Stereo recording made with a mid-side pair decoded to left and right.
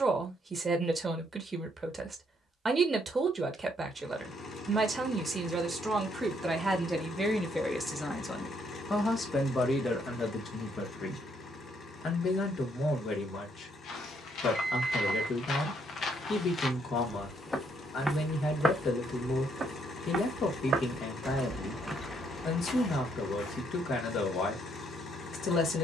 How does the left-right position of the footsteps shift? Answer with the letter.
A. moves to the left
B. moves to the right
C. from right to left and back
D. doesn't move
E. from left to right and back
E.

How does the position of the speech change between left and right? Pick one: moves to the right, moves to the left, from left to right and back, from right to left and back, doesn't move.
moves to the left.